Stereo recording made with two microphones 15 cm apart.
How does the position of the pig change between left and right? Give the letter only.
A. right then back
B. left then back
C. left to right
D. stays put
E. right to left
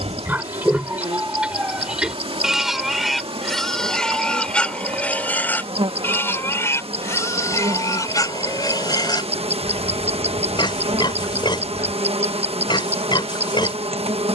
E.